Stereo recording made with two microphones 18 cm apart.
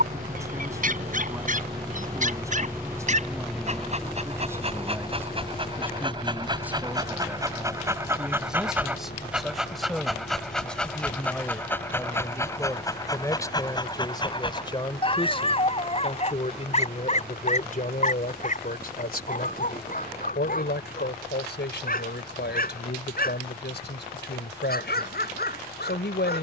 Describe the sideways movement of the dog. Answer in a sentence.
You can hear the dog go from the right side to the left.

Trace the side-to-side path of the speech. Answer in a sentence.
In this clip you hear the speech move to the left.